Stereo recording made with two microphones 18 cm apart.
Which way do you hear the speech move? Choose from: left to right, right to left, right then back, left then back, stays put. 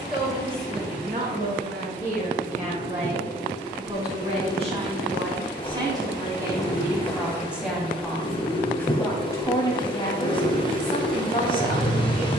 right to left.